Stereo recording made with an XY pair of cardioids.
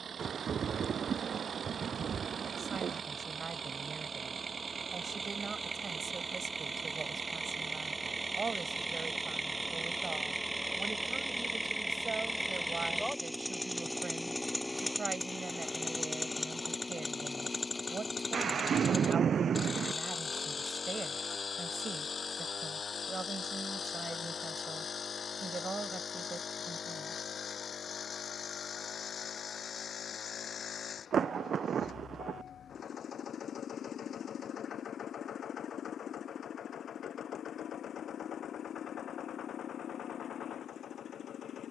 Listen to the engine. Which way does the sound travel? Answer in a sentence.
You can hear the engine move to the left.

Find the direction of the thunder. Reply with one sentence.
You can hear the thunder on the right.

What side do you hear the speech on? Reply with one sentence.
You can hear the speech on the right.